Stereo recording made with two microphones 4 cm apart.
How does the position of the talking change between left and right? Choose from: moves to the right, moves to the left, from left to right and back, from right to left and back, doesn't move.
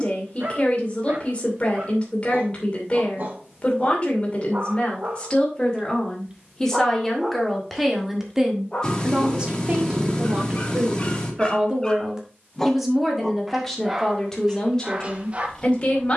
from left to right and back.